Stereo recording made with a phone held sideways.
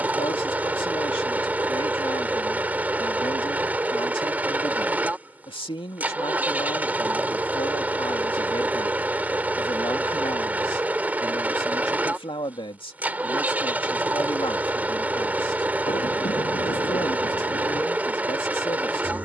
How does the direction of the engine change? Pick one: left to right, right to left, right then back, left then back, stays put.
stays put.